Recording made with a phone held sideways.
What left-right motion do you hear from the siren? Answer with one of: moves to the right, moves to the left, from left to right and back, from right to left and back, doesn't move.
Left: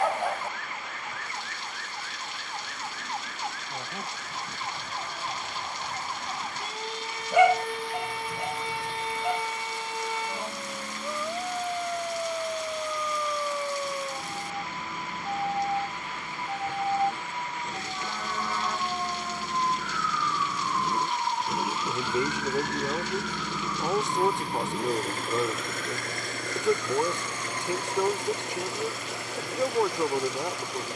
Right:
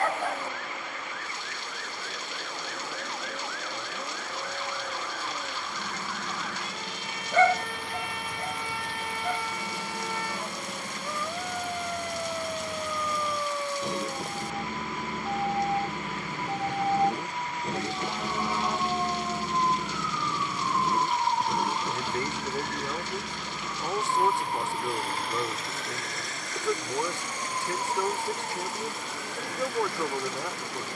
moves to the right.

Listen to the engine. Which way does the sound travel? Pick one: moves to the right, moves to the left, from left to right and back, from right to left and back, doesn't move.
moves to the left.